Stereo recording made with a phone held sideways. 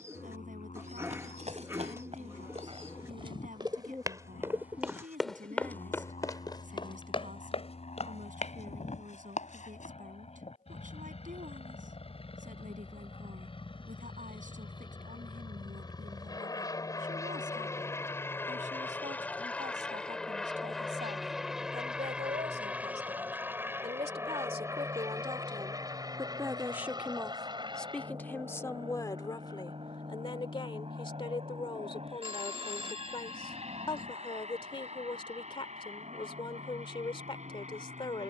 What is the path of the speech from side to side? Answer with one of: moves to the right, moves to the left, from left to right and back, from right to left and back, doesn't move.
moves to the left.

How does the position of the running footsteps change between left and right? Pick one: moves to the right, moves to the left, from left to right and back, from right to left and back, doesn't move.
moves to the left.